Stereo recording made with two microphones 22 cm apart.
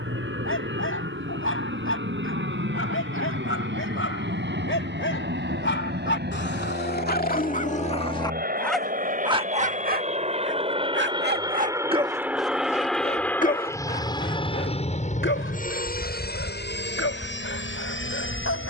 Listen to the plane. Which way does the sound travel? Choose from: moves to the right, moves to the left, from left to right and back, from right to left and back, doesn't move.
moves to the left.